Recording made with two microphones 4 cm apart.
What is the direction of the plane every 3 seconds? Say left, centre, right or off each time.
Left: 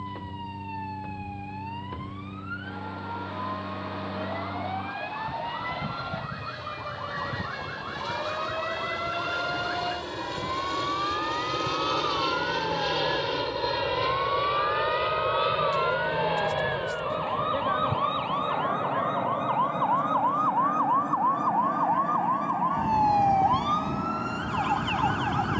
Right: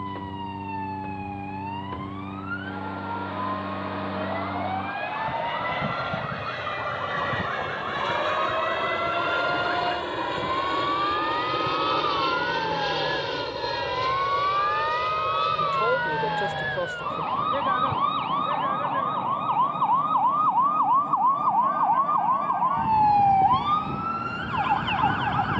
right, right, right, right, centre, left, left, left, left.